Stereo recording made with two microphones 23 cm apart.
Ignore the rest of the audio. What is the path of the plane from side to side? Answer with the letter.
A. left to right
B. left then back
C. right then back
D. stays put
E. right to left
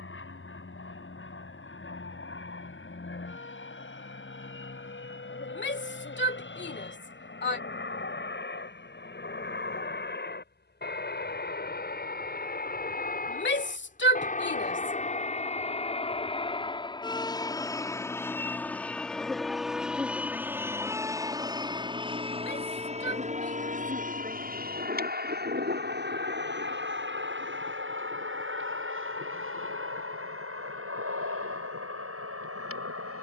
A.